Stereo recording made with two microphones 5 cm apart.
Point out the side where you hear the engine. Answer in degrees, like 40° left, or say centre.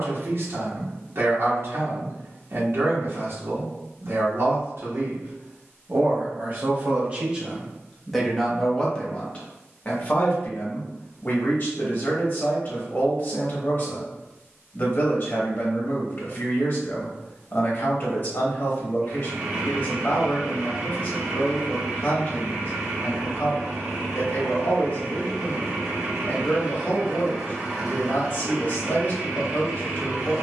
20° right.